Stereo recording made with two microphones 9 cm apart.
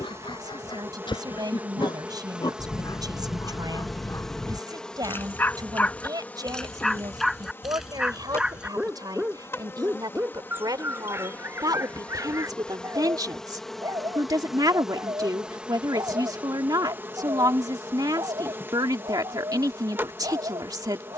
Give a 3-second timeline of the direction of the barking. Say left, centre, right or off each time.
left, left, centre, right, right, right, right.